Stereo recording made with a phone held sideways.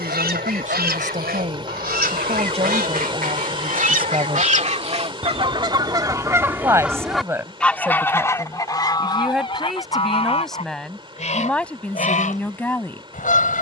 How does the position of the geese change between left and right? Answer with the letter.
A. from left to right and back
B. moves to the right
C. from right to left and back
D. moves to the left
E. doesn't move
D.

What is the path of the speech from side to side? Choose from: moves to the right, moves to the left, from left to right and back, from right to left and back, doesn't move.
moves to the left.